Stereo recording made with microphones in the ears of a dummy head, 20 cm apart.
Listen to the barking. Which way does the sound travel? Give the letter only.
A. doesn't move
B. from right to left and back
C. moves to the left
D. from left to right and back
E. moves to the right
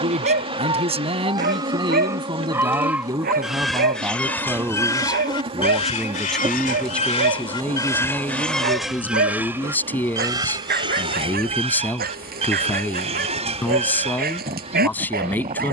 A.